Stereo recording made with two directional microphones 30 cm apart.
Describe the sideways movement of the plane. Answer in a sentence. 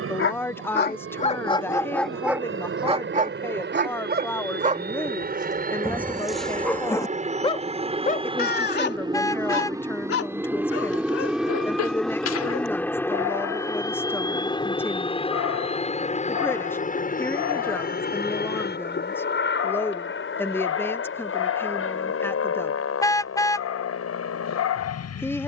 You can hear the plane go from the right side to the left.